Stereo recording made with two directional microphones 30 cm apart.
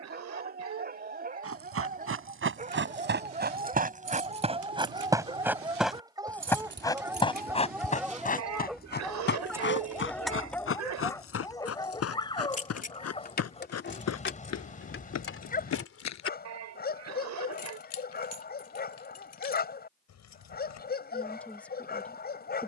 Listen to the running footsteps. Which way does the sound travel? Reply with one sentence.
In this clip you hear the running footsteps travel towards the left.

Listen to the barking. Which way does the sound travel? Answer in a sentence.
You can hear the barking move to the left.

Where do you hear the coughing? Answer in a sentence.
You can hear the coughing on the right.